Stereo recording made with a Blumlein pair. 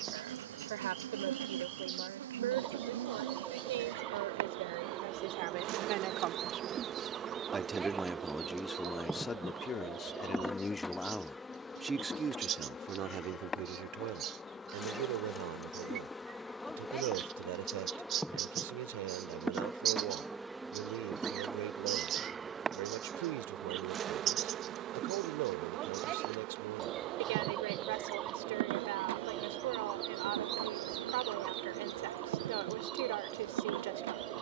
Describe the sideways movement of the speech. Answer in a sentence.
In this clip you hear the speech move from right to left and back again.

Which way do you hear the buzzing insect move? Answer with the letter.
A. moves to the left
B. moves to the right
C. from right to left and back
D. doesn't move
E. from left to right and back
C.